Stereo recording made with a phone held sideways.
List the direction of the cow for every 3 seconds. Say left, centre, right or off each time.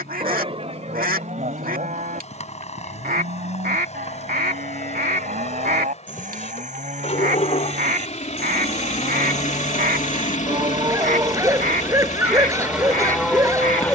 right, right, right, right, centre.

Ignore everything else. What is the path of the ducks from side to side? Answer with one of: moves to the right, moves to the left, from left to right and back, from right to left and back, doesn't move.
doesn't move.